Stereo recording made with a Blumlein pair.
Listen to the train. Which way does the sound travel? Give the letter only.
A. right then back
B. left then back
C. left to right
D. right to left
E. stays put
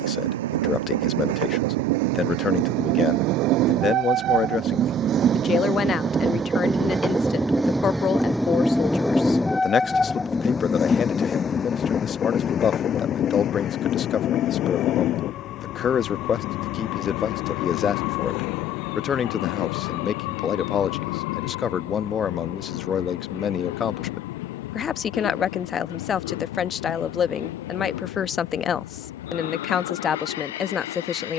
D.